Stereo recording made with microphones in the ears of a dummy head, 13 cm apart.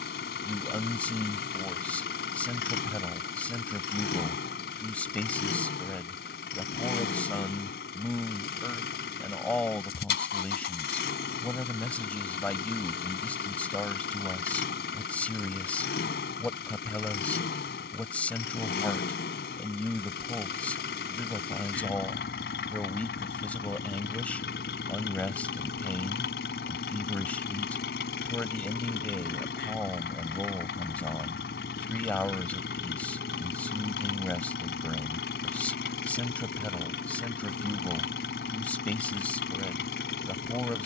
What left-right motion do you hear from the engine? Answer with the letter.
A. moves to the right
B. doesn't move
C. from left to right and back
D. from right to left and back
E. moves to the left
B.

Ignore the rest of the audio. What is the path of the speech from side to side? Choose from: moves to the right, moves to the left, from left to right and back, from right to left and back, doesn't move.
doesn't move.